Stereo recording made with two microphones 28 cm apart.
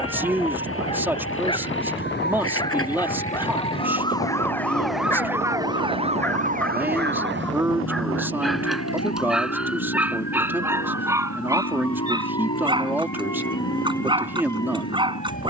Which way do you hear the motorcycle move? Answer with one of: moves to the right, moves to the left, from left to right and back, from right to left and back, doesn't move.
doesn't move.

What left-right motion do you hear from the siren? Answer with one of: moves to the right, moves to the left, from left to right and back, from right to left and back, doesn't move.
moves to the right.